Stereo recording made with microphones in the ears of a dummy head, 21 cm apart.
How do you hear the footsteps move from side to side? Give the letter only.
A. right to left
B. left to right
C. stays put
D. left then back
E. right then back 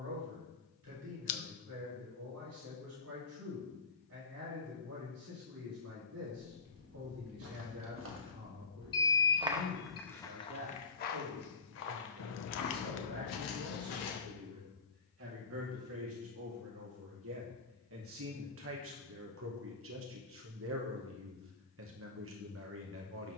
A.